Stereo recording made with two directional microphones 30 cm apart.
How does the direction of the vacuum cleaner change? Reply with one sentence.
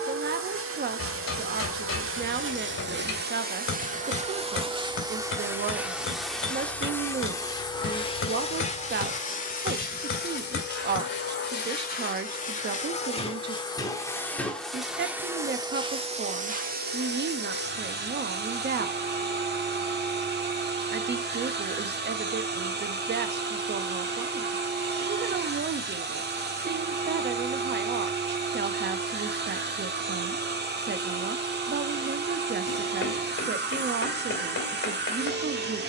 You can hear the vacuum cleaner go left and come back.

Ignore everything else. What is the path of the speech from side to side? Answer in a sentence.
You can hear the speech stay put.